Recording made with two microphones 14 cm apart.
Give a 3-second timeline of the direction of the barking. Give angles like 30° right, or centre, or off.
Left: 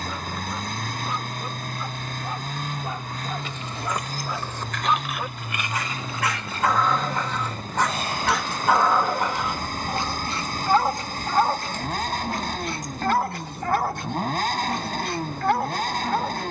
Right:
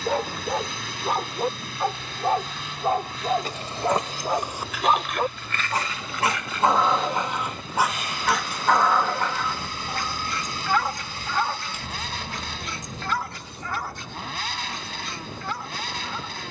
60° right, 50° right, 10° right, 30° left, 60° left, 70° left.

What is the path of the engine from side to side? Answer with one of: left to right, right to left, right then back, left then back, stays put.
stays put.